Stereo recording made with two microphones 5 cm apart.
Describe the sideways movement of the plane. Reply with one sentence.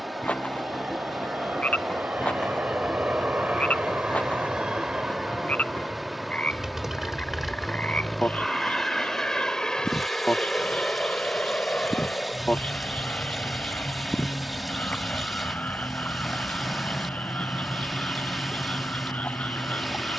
In this clip you hear the plane move from right to left.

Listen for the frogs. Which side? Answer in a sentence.
You can hear the frogs on the left.